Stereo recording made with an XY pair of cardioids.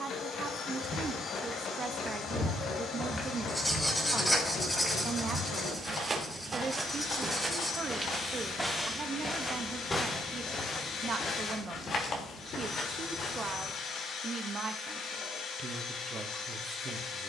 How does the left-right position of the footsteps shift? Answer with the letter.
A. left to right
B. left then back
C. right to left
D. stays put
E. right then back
E.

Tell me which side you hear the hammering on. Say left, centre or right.
left.